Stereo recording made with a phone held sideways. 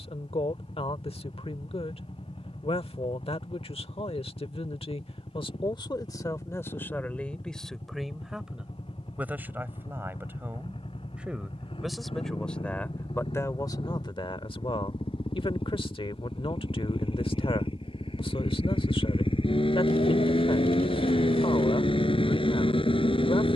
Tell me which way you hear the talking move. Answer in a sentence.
You can hear the talking go right and come back.